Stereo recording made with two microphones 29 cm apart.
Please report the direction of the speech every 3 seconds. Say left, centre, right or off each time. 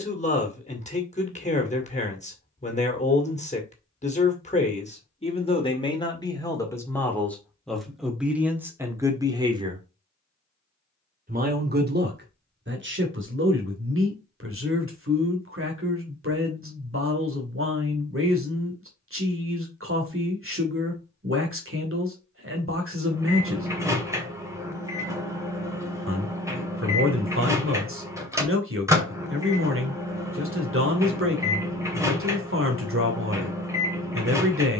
left, left, centre, right, right, right, right, right, right, right, right, right.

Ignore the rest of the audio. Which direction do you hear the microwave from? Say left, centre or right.
centre.